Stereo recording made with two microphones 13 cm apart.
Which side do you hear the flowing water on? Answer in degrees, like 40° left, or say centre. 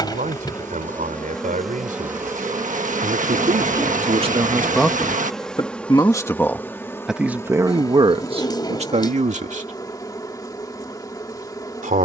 70° right.